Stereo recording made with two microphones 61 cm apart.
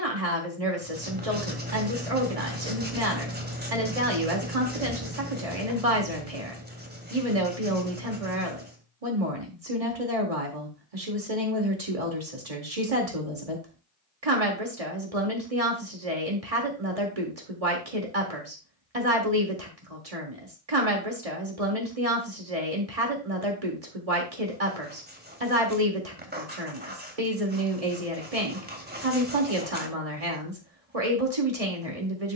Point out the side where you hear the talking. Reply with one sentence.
In this clip you hear the talking on the right.